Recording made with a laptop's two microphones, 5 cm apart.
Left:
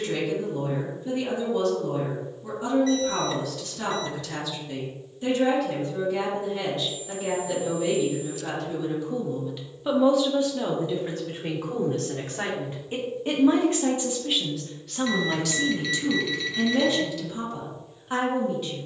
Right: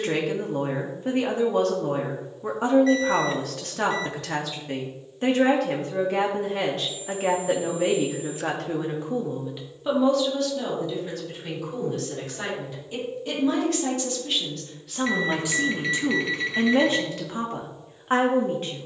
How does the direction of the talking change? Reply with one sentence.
You can hear the talking go left and come back.